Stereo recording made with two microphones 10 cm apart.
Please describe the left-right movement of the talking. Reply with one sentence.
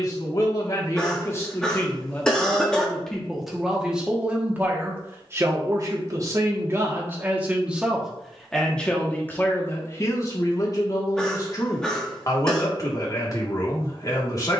You can hear the talking go right and come back.